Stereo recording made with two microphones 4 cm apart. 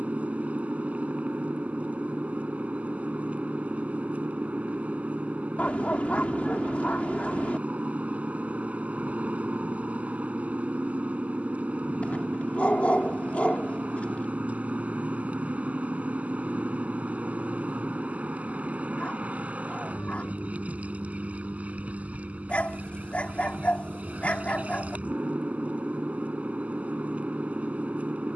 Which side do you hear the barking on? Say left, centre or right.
left.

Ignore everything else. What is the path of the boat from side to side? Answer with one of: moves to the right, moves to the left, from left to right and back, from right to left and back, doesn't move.
doesn't move.